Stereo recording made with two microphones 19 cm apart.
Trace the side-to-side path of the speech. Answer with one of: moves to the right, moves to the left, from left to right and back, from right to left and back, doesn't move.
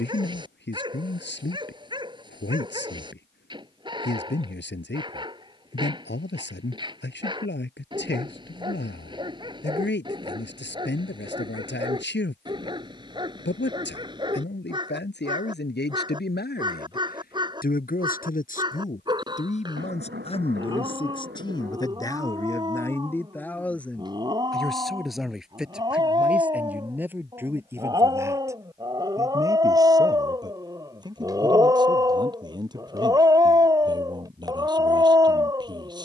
moves to the right.